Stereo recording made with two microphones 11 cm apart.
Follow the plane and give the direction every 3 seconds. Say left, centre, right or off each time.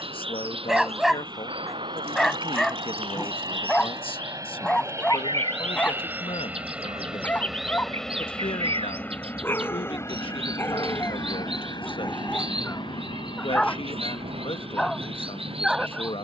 right, right, centre, left, left, left.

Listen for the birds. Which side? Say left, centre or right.
right.